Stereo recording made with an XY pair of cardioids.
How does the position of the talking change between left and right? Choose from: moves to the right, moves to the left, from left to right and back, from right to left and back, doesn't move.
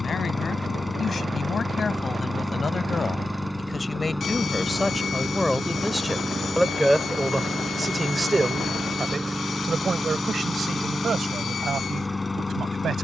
moves to the right.